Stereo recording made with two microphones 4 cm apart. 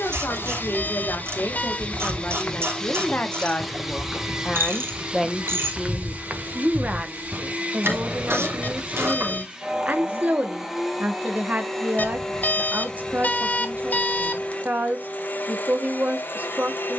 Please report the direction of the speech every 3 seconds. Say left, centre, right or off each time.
left, centre, right, right, right, right.